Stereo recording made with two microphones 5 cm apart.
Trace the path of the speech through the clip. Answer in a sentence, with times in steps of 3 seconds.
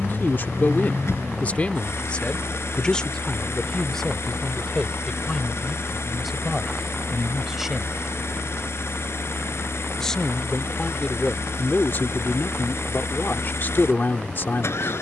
In this clip you hear the speech on the left from 0 s, in the centre from 3 s and on the left from 9 s.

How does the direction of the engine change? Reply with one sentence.
You can hear the engine stay put.